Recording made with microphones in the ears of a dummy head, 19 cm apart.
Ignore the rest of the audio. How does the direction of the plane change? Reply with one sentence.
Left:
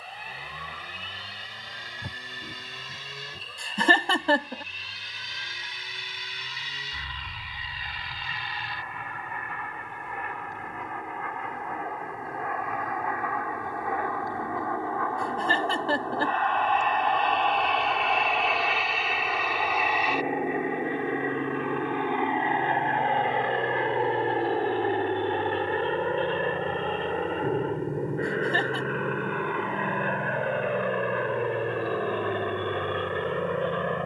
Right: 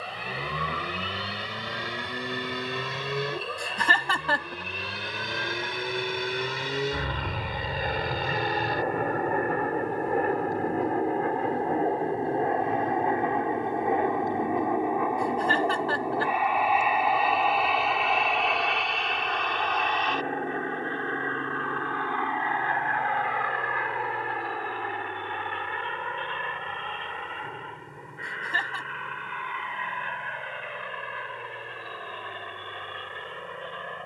In this clip you hear the plane move from right to left.